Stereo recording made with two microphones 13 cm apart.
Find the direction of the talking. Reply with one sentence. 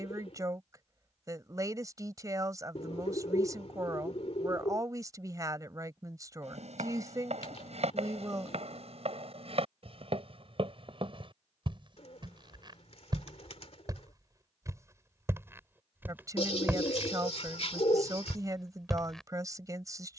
In this clip you hear the talking on the right.